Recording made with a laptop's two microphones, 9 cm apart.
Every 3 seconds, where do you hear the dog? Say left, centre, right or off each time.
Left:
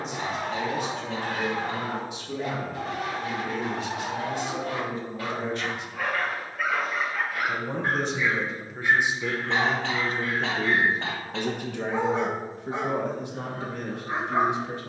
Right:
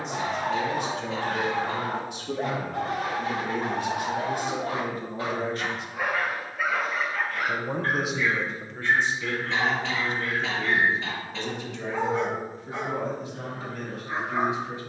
right, right, centre, left, left.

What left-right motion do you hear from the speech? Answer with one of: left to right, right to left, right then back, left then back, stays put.
right to left.